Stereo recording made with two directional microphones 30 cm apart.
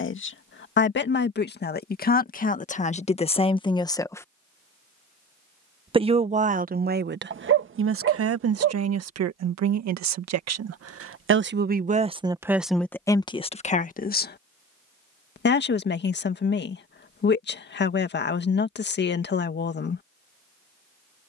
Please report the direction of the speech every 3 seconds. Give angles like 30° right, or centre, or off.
30° left, 10° left, 40° right, 50° right, 10° left, 40° left, 40° left.